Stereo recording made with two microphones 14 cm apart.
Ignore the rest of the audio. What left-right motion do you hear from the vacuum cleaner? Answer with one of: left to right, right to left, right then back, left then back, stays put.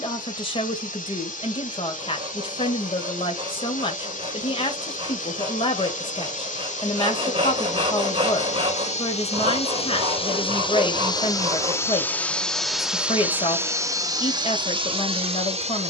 left to right.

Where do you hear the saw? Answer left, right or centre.
right.